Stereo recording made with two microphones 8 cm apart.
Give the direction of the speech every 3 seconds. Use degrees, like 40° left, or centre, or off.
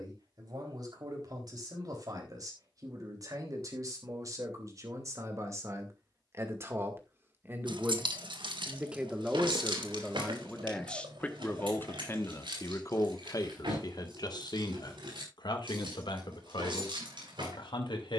50° right, 40° right, 30° right, 10° left, 50° left, 70° left.